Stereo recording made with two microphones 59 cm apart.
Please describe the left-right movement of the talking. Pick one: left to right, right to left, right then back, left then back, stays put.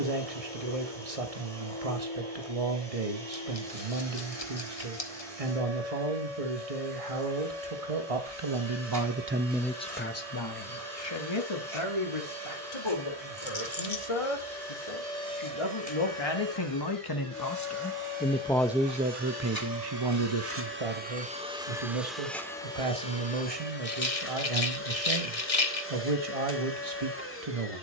left then back.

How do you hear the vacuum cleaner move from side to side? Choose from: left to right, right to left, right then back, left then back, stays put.
right to left.